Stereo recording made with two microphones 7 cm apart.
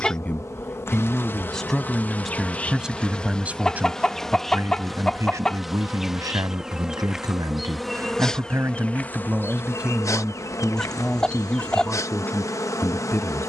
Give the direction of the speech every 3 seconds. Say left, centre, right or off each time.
centre, right, right, centre, left.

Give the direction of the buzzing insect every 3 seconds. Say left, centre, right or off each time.
left, centre, centre, left, left.